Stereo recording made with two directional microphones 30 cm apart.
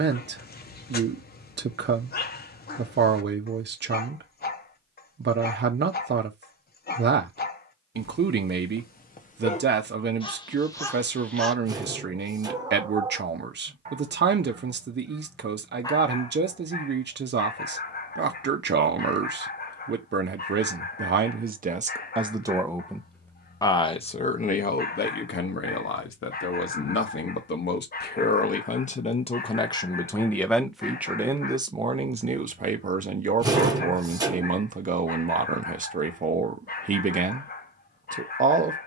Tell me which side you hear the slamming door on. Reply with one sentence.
In this clip you hear the slamming door in the centre.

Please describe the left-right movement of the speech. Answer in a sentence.
You can hear the speech go left and come back.